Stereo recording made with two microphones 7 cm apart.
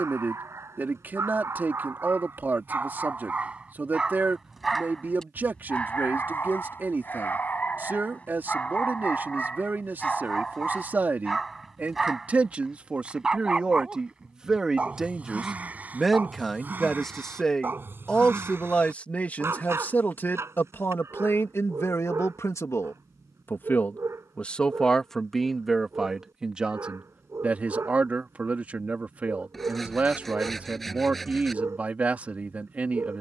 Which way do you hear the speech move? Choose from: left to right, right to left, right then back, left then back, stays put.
left then back.